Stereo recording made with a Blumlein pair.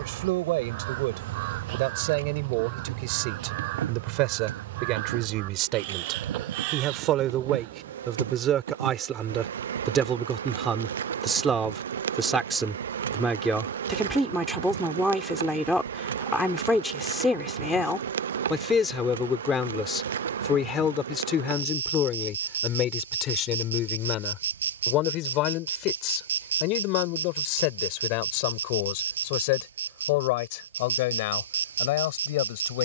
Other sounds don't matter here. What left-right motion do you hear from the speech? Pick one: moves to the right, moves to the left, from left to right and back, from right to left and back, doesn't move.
moves to the left.